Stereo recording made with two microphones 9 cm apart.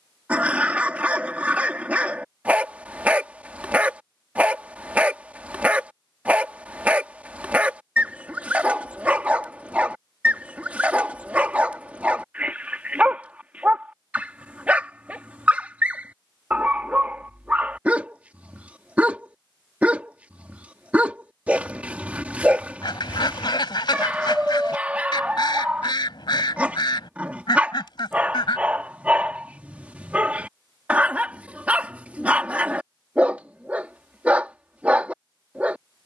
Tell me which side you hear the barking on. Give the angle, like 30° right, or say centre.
20° right.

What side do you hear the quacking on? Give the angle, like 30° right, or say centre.
60° left.